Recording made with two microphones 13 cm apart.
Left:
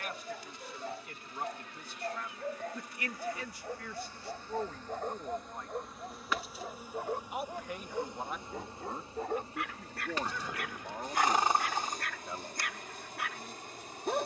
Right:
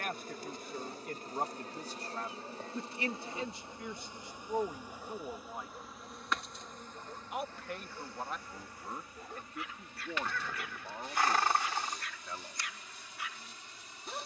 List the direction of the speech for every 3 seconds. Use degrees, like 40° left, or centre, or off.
40° right, 20° right, centre, 10° left, 20° left.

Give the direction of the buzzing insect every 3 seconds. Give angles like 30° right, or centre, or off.
40° right, 20° right, 10° left, 40° left, 50° left.